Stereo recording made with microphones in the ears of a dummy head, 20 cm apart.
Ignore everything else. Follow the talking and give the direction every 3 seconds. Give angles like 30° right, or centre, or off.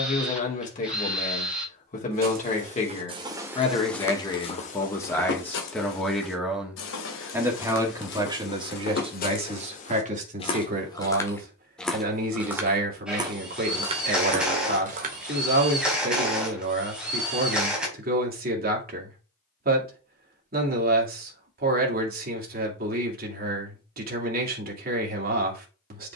30° left, 20° left, 10° right, 40° right, 40° right, 40° right, 40° right, 40° right, 40° right.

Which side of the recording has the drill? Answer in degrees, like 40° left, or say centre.
centre.